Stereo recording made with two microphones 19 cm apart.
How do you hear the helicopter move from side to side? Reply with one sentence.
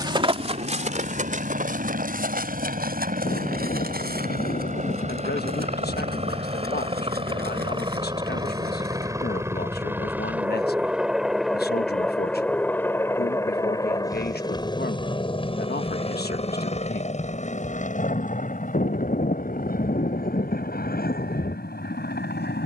In this clip you hear the helicopter go from the right side to the left.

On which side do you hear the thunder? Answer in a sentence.
In this clip you hear the thunder on the left.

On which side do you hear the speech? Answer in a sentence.
In this clip you hear the speech on the left.